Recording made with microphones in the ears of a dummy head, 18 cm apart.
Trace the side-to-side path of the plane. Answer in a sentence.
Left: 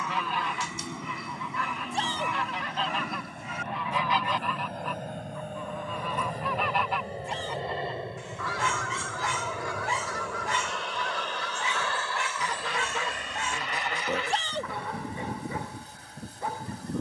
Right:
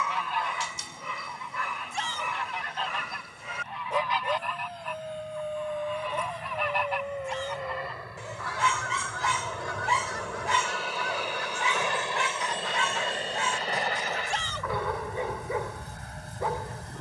In this clip you hear the plane move to the right.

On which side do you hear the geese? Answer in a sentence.
In this clip you hear the geese on the left.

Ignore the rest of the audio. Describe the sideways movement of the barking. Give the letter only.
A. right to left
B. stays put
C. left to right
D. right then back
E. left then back
B.